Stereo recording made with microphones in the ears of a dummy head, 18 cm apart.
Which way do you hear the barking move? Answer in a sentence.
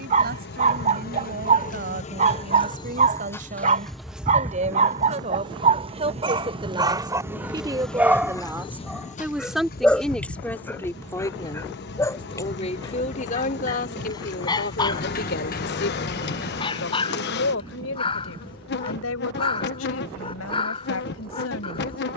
You can hear the barking travel towards the left.